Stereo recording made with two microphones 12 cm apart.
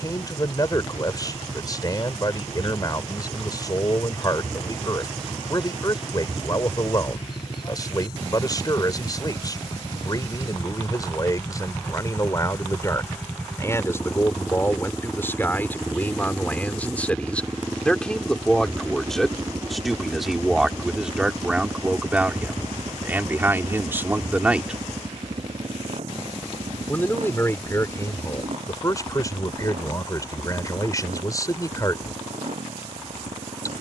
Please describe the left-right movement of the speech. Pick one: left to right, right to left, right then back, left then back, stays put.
right then back.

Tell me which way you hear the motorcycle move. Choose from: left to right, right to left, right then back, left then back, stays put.
left to right.